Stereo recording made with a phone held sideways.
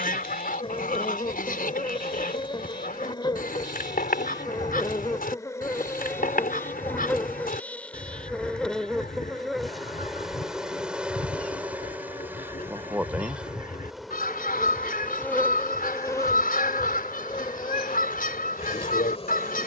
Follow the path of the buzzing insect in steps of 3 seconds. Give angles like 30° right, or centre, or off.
40° left, 30° left, 10° left, centre, 10° right, 20° left, 40° left.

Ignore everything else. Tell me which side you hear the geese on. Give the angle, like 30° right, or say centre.
80° left.